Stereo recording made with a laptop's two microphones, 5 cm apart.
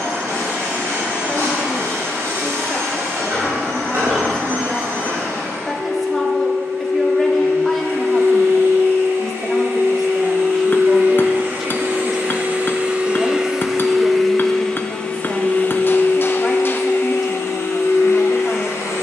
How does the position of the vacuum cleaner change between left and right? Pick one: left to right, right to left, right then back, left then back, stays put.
right to left.